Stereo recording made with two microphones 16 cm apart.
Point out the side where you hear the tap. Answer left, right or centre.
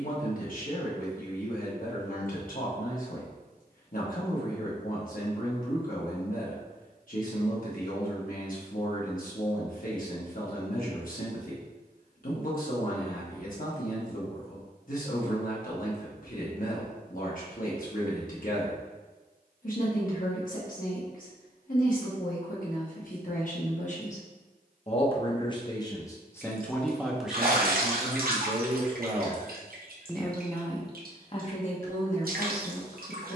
right.